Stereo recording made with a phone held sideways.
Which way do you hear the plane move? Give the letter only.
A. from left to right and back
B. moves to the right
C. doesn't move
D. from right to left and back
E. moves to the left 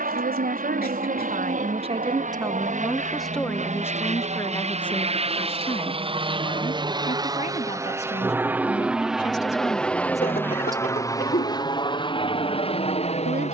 E.